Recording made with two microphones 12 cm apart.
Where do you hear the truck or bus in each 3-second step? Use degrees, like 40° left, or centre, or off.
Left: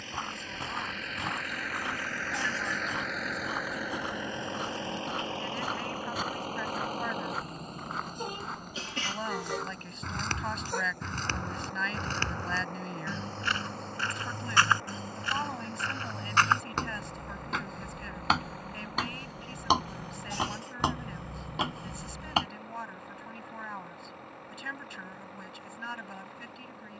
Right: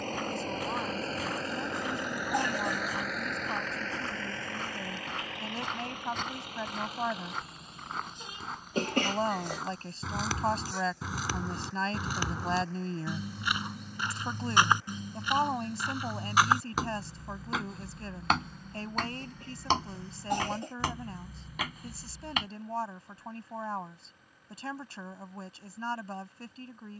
30° right, 20° left, 50° left, 60° left, 60° left, 70° left, 70° left, 70° left, 70° left.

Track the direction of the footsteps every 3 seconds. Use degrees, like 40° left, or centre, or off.
30° left, 10° left, centre, 10° right, 10° right, 10° right, 10° left, 30° left, off.